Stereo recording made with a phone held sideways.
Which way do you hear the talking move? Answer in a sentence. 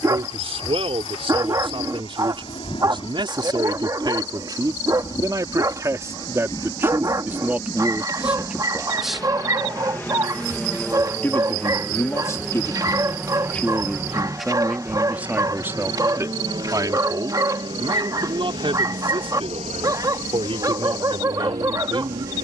In this clip you hear the talking go left and come back.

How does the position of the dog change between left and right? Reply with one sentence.
In this clip you hear the dog stay in one place.